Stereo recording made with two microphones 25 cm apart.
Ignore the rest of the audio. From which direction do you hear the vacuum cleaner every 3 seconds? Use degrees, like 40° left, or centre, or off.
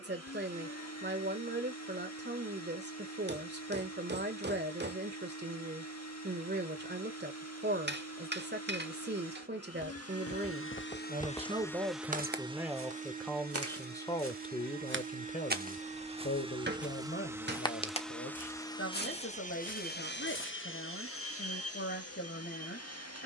80° left, 80° left, 80° left, 50° left, 30° right, 20° right, 30° left, 70° left.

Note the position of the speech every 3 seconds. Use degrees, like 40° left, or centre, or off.
40° right, 40° right, 40° right, 30° right, 10° left, 40° left, 50° left, 50° left.